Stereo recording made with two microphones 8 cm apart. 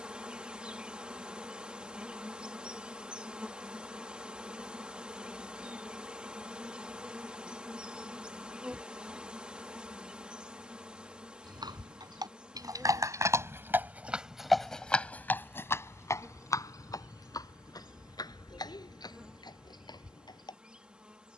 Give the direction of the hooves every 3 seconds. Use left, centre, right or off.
off, off, off, right, right, left, left.